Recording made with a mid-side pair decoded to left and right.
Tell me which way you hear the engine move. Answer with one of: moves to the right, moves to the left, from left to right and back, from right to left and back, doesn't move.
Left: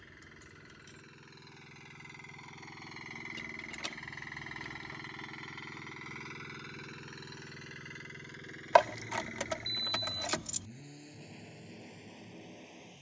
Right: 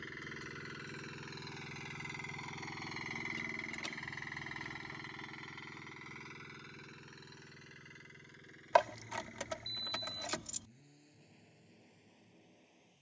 moves to the left.